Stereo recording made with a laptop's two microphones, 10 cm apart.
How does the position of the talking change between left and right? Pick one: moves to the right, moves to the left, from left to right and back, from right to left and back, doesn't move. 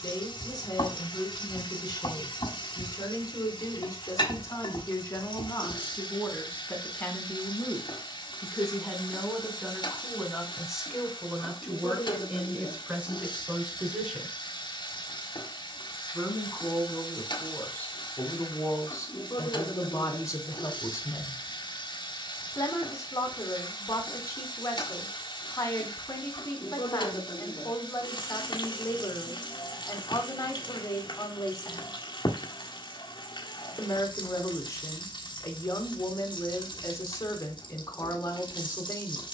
from left to right and back.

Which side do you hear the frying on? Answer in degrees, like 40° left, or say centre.
50° left.